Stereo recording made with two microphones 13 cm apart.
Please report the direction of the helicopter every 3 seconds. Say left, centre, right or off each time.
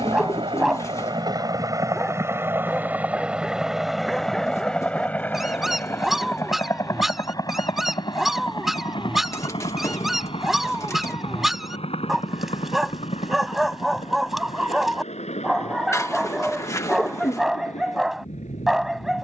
right, centre, left, left, left, left, left.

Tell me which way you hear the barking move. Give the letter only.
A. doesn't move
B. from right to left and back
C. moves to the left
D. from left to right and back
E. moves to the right
A.